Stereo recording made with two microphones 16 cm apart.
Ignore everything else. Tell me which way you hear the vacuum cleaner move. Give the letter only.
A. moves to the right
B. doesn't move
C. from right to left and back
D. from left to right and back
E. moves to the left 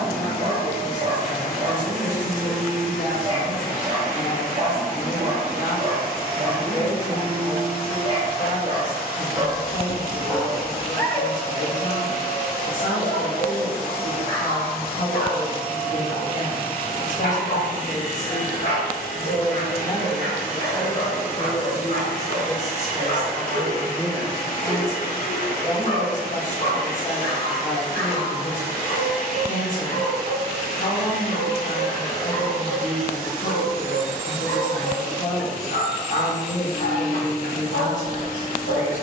B.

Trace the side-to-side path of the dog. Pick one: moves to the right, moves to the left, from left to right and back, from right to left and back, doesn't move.
moves to the left.